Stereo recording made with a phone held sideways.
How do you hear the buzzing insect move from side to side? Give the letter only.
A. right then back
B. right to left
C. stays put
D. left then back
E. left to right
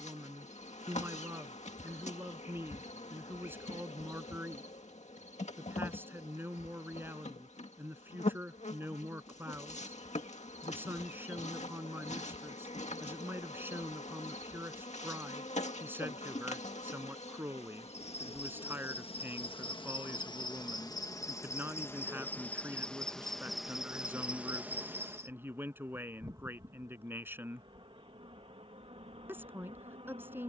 E.